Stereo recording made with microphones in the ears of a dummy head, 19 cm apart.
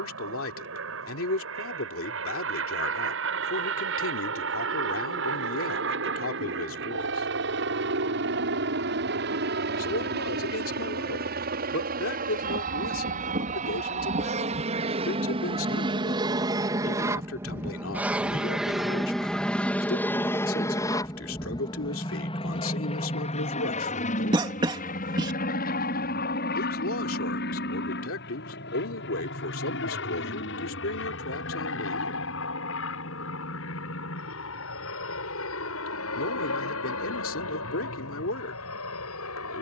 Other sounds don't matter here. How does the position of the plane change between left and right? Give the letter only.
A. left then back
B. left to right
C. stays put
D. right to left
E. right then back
D.